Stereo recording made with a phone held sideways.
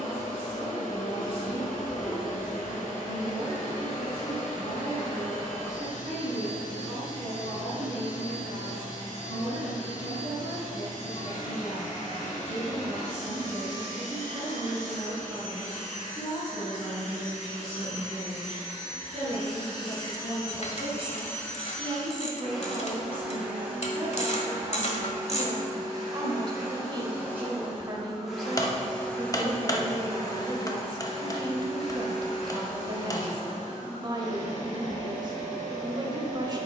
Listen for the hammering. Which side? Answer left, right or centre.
left.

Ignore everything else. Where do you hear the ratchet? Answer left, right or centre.
left.